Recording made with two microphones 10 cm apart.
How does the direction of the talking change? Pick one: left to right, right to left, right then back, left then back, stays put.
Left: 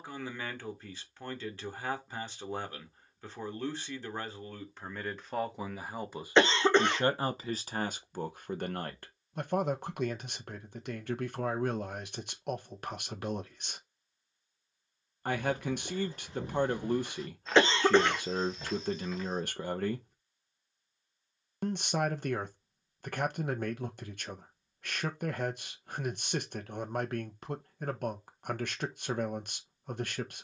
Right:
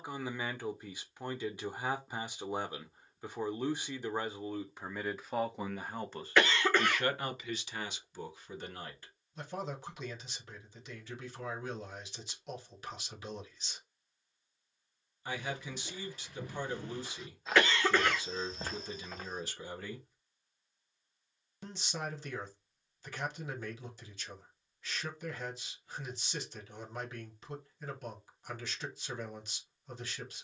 right to left.